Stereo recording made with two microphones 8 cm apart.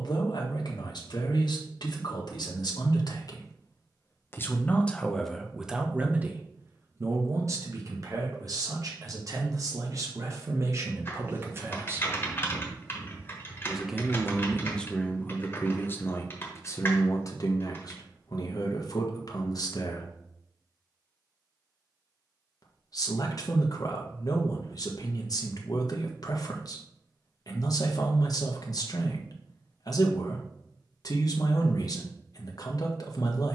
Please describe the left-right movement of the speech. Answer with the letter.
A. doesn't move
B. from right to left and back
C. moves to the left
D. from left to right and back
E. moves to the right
D.